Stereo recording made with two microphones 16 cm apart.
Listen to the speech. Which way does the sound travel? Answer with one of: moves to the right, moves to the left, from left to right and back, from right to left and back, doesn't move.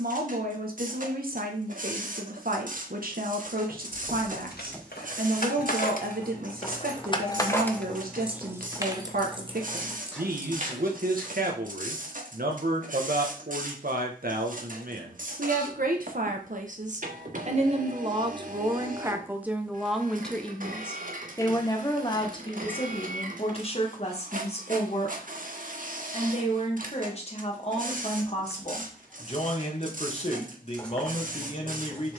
moves to the left.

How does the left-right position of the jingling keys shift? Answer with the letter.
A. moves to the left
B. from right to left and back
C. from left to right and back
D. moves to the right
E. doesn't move
D.